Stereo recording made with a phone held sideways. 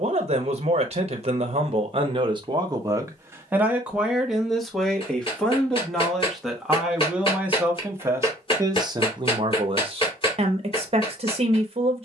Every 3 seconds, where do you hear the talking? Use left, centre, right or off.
right, centre, centre, right.